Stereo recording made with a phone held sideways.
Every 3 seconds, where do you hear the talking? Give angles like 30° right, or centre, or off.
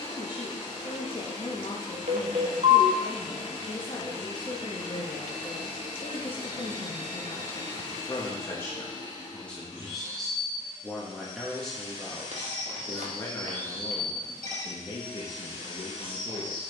40° left, 40° left, 30° left, centre, 30° left, 40° left.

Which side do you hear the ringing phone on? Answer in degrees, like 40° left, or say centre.
60° right.